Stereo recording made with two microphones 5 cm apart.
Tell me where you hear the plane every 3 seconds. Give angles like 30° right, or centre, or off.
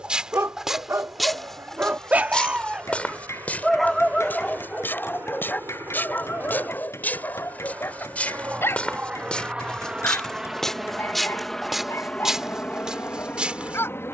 60° right, 60° right, 40° right, 10° right, 30° left.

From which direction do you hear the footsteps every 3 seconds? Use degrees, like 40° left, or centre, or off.
centre, 40° left, 30° left, 10° left, 20° right.